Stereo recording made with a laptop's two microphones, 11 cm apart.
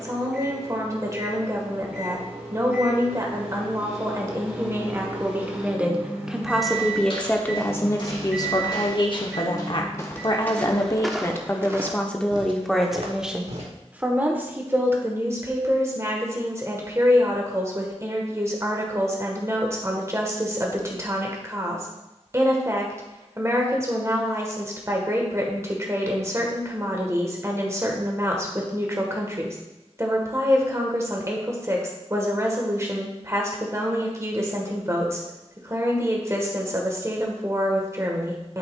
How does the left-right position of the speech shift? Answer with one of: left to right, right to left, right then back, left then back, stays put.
left then back.